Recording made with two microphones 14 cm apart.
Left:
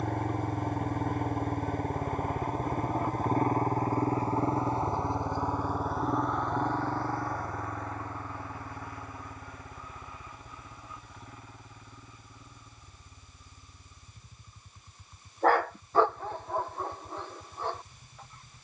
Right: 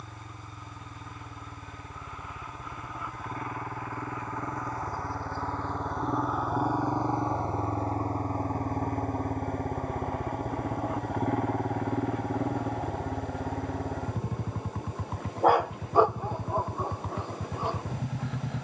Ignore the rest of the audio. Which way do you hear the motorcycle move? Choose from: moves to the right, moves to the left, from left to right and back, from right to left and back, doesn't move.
moves to the right.